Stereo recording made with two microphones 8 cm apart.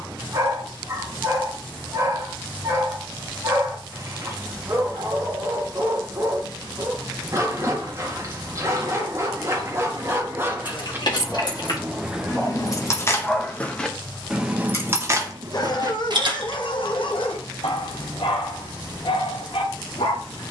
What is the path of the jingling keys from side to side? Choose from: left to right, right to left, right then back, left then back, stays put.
left to right.